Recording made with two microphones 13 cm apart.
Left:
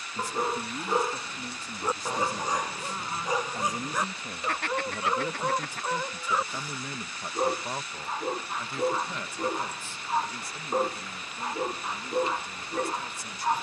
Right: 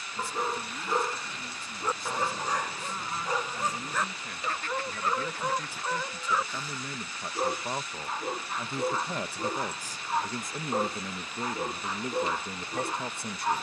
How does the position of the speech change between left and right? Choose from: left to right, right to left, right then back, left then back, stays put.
left to right.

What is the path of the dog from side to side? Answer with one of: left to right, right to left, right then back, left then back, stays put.
stays put.